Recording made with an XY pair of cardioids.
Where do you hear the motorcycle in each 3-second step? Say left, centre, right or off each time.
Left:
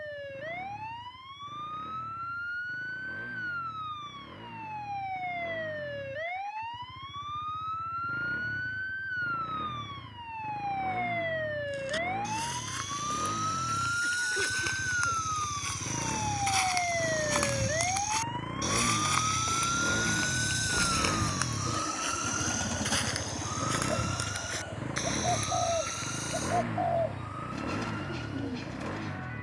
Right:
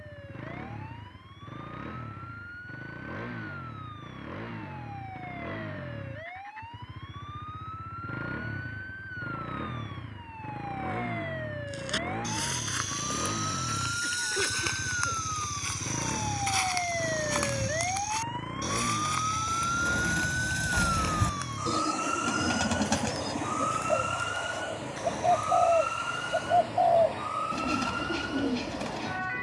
right, right, right, right, right, centre, centre, left, left, left.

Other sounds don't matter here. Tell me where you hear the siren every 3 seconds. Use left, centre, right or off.
left, left, left, left, left, centre, centre, right, right, right.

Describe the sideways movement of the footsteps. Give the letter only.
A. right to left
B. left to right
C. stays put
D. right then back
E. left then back
A.